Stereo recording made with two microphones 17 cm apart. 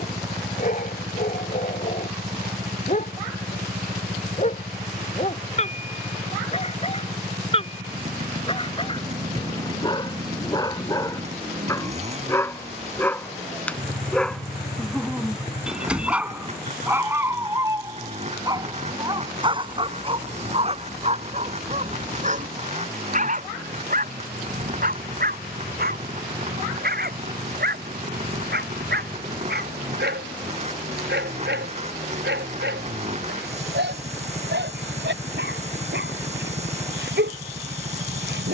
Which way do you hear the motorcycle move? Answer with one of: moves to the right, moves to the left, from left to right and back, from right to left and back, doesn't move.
doesn't move.